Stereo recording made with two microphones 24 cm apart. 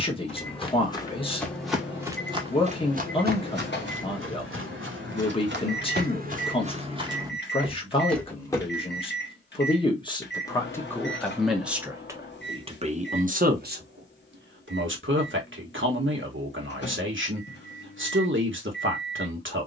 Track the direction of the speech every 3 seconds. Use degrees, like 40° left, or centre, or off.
20° left, 20° left, 20° left, 10° left, 40° right, 50° right, 50° right.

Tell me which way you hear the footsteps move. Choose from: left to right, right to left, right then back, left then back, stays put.
right then back.